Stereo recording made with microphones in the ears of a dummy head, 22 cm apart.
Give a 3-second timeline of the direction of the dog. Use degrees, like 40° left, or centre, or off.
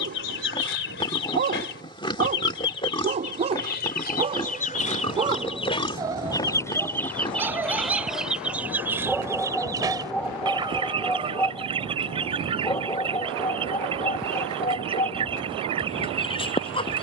30° right, 20° right, 10° right, centre, 20° left, 20° left.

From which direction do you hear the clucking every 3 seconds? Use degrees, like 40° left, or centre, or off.
50° left, 40° left, centre, 20° right, 20° right, 20° right.